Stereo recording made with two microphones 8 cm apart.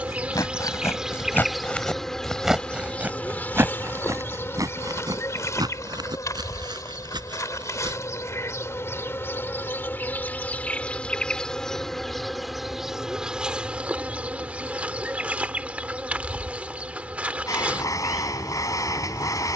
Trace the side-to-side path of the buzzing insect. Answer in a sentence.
You can hear the buzzing insect go left and come back.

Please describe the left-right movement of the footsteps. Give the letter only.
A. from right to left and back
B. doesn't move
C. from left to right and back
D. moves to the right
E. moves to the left
D.